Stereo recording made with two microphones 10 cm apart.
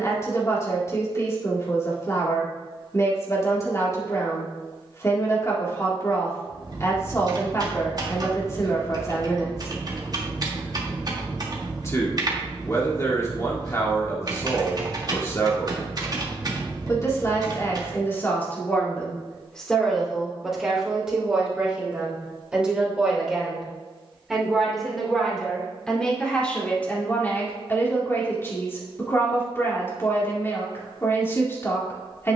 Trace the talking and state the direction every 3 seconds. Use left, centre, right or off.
left, left, left, left, left, left, centre, centre, centre, left, left.